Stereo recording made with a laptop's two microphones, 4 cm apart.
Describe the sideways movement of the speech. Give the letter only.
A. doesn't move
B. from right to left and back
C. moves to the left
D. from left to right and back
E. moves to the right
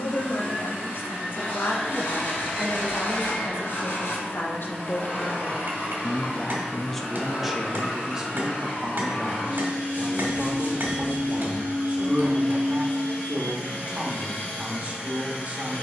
E.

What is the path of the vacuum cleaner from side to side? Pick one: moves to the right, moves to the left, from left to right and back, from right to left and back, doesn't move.
doesn't move.